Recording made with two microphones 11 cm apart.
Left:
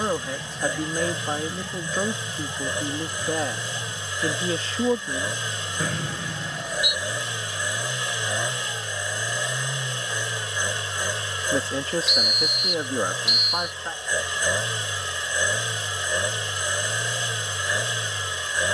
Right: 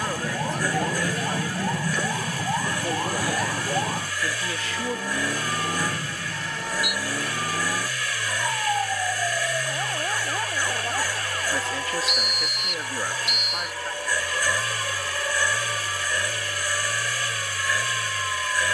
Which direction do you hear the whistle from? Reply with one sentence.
You can hear the whistle in the centre.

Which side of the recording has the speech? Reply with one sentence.
In this clip you hear the speech on the left.